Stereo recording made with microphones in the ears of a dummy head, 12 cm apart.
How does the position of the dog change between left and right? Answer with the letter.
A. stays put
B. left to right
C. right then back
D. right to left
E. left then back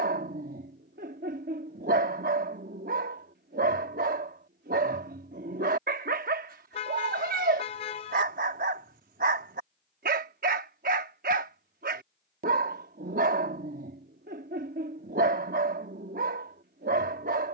A.